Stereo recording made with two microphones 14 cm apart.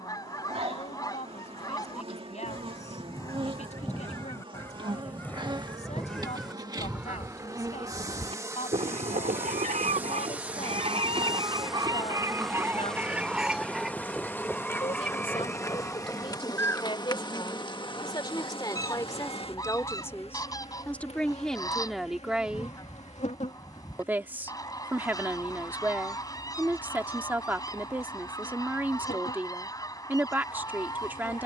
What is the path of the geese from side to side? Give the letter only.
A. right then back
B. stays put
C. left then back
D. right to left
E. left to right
A.